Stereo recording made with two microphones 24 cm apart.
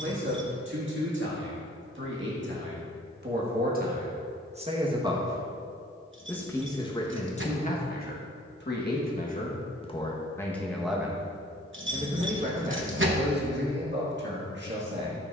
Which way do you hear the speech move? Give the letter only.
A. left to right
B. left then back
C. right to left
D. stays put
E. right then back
B.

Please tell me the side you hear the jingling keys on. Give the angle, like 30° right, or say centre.
50° right.